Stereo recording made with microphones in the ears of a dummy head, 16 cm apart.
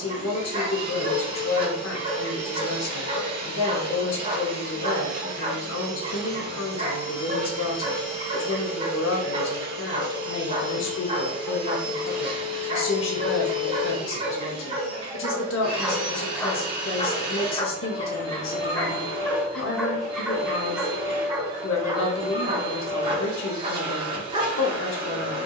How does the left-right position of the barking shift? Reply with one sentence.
You can hear the barking go left and come back.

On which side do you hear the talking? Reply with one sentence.
You can hear the talking on the left.